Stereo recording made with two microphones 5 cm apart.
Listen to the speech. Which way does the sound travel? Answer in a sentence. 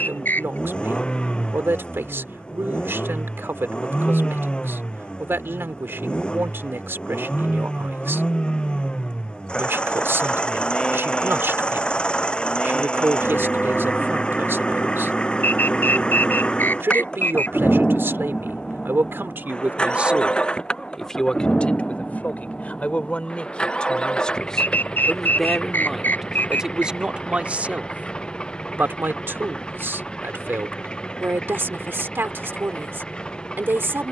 In this clip you hear the speech move from right to left and back again.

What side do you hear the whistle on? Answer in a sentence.
In this clip you hear the whistle on the left.